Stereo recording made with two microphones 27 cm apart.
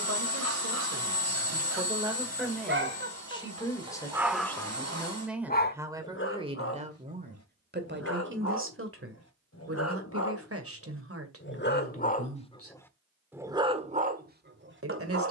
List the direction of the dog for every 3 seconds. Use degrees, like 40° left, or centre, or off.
50° right, centre, 60° left, 50° left, 10° right.